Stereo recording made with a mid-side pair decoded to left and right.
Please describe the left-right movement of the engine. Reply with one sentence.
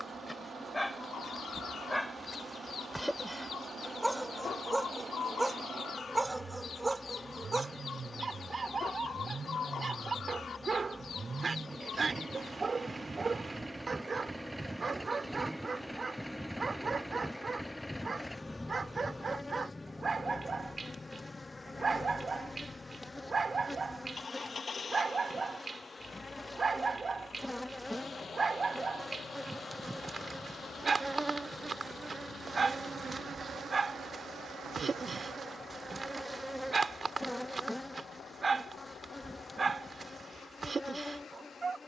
In this clip you hear the engine move from right to left.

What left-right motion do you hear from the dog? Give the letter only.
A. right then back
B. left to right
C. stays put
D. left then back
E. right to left
B.